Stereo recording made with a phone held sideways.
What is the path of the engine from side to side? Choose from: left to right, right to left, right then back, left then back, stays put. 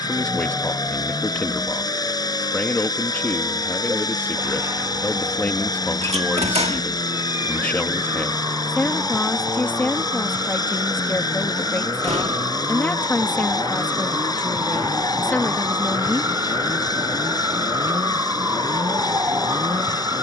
stays put.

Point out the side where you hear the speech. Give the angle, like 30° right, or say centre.
10° left.